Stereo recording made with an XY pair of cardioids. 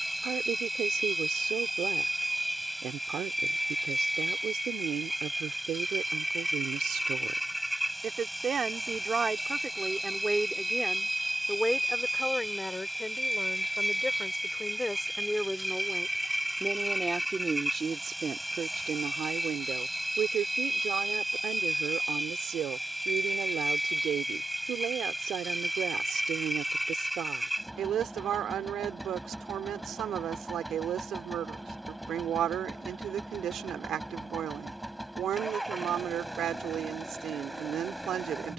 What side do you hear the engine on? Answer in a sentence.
You can hear the engine in the centre.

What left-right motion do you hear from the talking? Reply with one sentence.
You can hear the talking go left and come back.